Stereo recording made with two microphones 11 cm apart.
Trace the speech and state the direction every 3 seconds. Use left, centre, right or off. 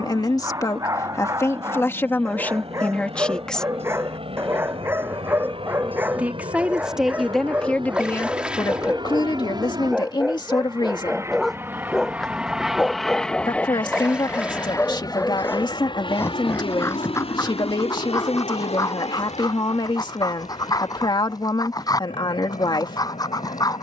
left, centre, centre, left, left, left, left, left.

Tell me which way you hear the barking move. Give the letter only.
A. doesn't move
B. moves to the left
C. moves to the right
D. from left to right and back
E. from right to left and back
B.